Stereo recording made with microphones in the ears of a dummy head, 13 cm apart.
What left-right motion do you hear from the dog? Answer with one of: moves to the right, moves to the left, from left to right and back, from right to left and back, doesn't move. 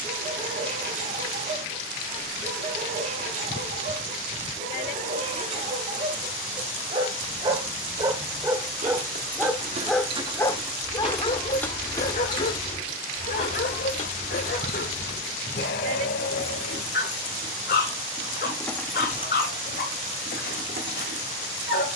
moves to the left.